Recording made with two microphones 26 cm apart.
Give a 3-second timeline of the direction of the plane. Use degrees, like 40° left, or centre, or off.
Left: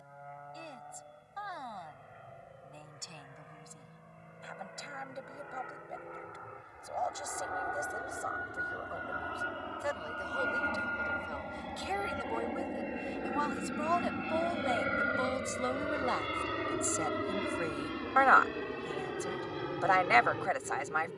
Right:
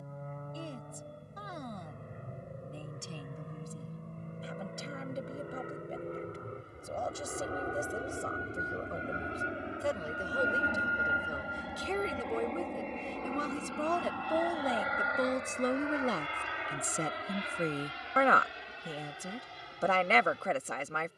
50° right, 50° right, 30° right, 10° right, 10° left, 40° left, 60° left.